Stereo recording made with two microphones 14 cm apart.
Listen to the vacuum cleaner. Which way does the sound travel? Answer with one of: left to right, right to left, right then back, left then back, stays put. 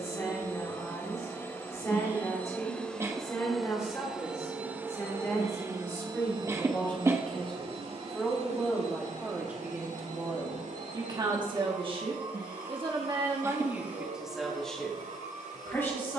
left to right.